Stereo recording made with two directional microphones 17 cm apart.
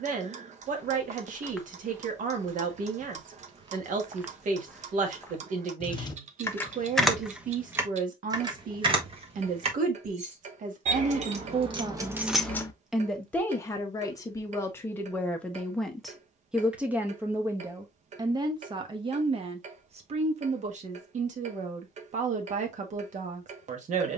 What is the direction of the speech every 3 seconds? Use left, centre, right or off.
right, right, right, right, centre, centre, right, right.